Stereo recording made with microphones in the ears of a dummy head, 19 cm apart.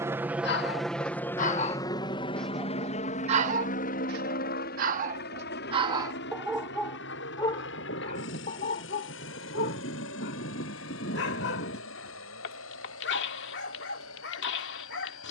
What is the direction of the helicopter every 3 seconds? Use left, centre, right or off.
centre, left, left, left, left.